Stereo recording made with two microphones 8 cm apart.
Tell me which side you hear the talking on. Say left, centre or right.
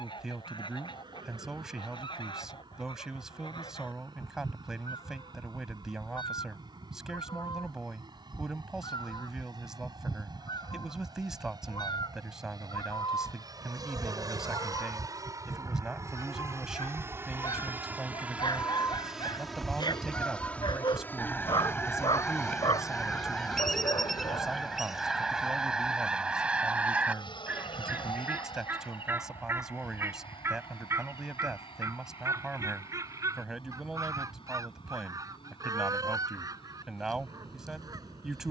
centre.